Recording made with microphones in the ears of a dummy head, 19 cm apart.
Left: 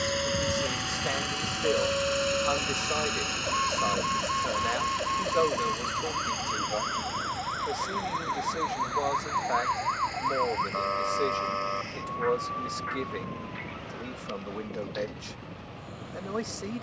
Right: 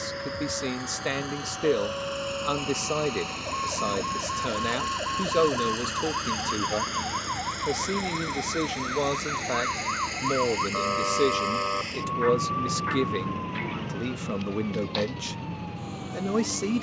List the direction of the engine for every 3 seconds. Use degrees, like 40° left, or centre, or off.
30° left, centre, 30° right, 40° right, 50° right, 60° right.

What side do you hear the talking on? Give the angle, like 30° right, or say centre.
40° right.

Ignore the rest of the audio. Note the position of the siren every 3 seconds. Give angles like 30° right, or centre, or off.
50° left, 30° left, 10° left, 30° right, 60° right, 70° right.